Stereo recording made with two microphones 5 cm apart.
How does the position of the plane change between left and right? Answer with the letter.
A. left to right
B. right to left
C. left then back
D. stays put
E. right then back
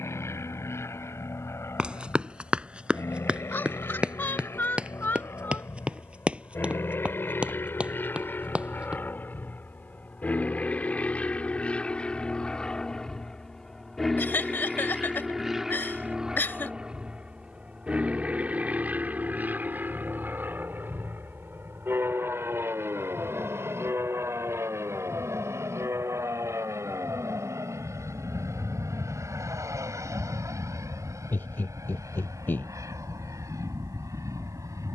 A.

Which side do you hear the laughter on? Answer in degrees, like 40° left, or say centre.
40° left.